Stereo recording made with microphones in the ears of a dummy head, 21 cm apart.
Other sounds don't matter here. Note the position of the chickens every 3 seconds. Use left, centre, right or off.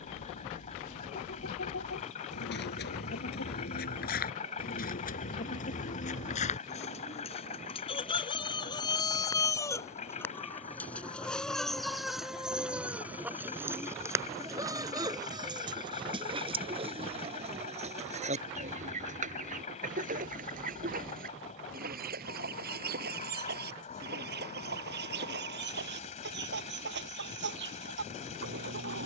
left, left, left, centre, centre, right, right, right, right, right.